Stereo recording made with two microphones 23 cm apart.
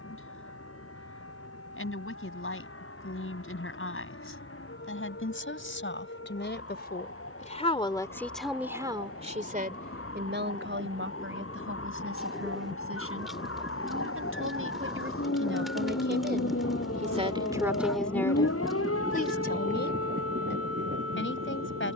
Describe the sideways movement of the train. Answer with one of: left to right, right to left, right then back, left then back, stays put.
left to right.